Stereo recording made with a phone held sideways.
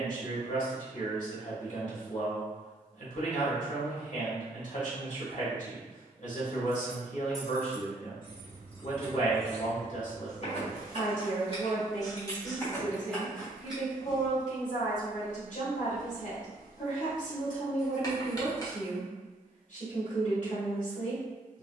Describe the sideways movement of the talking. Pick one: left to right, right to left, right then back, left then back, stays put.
stays put.